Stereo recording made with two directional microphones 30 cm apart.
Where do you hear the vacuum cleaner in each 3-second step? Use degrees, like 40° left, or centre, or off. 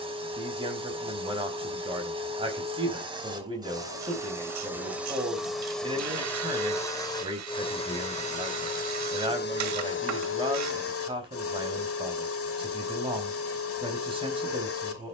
20° right, 10° right, 20° left, 40° left, 50° left.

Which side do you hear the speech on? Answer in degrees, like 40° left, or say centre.
20° right.